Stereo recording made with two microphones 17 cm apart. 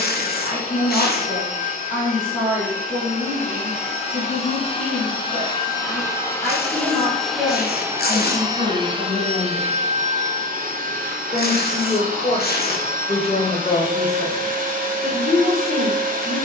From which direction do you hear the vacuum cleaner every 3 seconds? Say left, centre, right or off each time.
left, left, centre, right, right, right.